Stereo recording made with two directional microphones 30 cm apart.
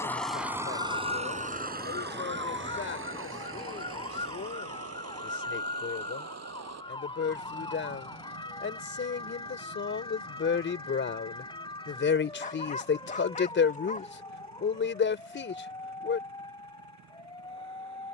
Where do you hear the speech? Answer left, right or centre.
left.